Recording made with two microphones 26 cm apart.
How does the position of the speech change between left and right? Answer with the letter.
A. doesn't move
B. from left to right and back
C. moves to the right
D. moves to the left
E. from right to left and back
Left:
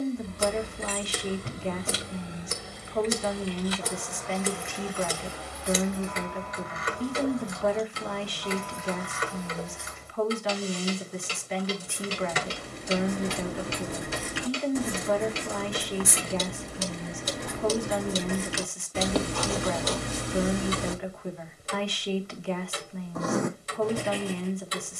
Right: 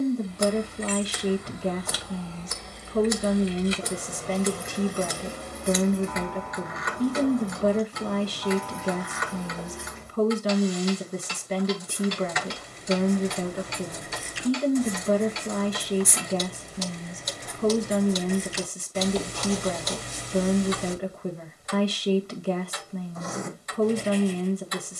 A.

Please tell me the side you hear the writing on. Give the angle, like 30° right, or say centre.
70° left.